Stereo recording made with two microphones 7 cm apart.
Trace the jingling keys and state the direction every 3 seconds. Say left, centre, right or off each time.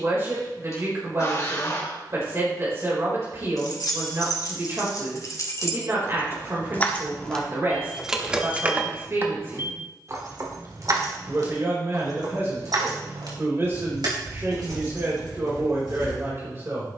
off, left, centre, right, right, right.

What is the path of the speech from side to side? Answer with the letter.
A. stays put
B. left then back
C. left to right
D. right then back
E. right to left
A.